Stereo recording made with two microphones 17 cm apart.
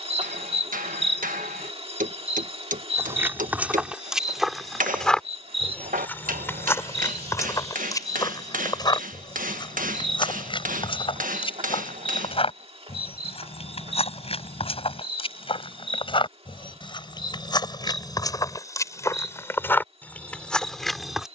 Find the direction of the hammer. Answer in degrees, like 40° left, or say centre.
50° right.